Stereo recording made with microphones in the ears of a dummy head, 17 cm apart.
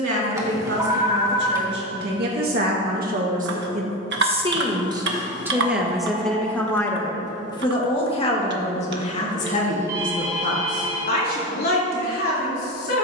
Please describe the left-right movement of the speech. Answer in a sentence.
You can hear the speech travel towards the left.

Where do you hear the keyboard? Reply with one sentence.
You can hear the keyboard on the right.